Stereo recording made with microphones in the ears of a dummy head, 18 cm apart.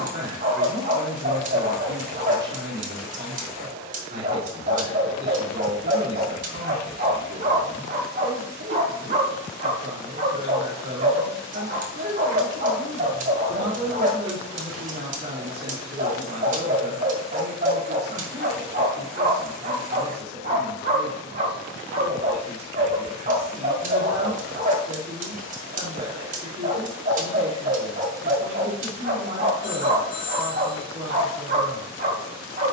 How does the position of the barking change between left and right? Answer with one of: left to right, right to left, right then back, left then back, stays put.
stays put.